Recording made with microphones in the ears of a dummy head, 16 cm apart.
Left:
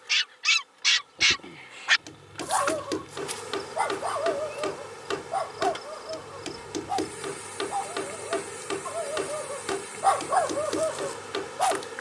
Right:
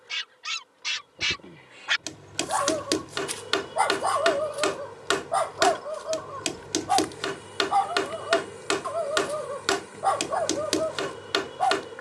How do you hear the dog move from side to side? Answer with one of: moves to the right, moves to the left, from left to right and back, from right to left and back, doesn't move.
from left to right and back.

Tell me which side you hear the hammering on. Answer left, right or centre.
right.